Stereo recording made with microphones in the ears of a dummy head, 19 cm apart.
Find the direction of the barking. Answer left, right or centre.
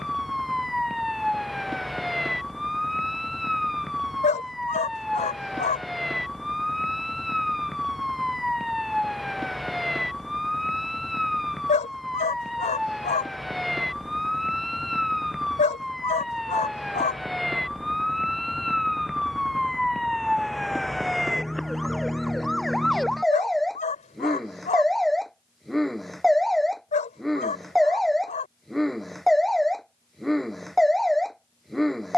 left.